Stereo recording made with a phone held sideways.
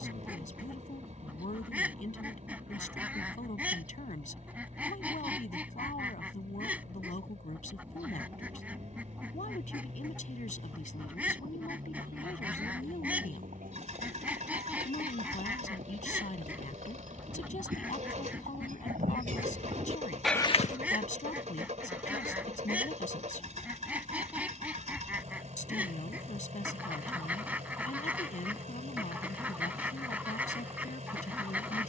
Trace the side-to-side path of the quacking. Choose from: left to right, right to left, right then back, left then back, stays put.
stays put.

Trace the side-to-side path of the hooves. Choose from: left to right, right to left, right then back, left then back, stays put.
right to left.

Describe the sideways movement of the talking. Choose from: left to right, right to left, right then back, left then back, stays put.
stays put.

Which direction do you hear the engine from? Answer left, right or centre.
right.